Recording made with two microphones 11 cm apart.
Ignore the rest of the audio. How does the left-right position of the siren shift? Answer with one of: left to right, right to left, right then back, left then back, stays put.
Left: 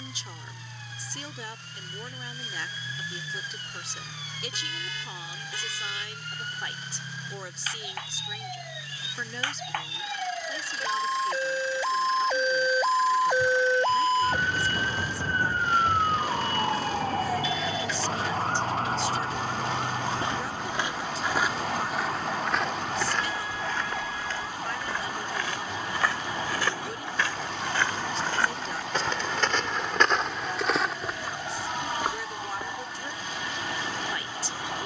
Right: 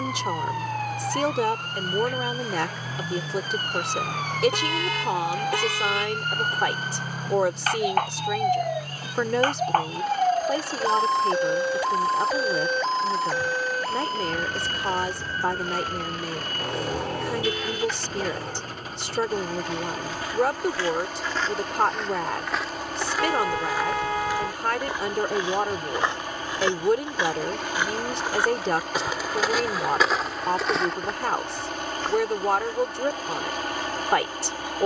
right to left.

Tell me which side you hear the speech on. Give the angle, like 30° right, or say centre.
70° right.